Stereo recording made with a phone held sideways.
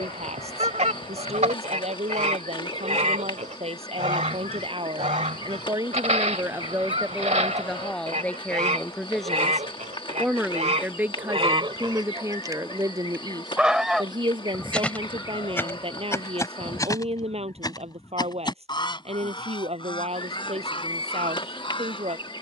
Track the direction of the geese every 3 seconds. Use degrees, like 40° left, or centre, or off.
50° right, 50° right, 50° right, 50° right, centre, 20° left, 40° left, 40° left.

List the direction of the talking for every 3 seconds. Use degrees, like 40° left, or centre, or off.
50° right, 40° right, centre, 10° right, 30° right, 40° right, 50° right, 50° right.